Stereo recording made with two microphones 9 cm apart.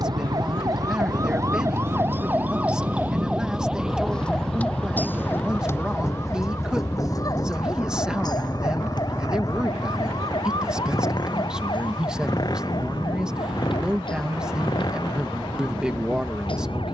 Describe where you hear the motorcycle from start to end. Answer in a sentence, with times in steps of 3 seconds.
In this clip you hear the motorcycle on the right from 0 s, in the centre from 3 s and on the left from 6 s.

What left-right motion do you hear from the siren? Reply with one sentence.
In this clip you hear the siren move from right to left.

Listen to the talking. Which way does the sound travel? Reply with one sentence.
In this clip you hear the talking stay put.